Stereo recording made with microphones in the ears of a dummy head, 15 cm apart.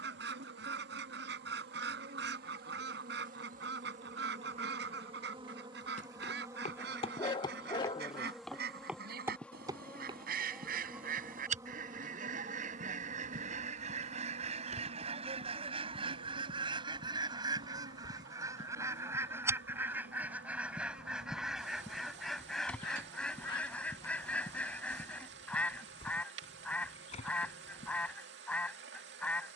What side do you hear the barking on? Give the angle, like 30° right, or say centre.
30° left.